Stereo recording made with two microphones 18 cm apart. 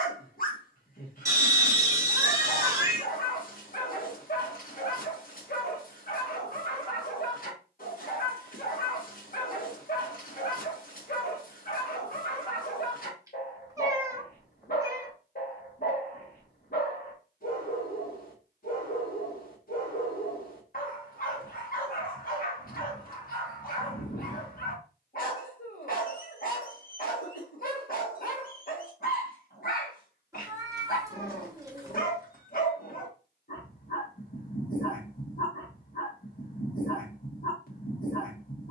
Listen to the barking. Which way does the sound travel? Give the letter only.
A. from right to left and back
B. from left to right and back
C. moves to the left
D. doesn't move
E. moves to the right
D.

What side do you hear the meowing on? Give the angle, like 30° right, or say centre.
20° right.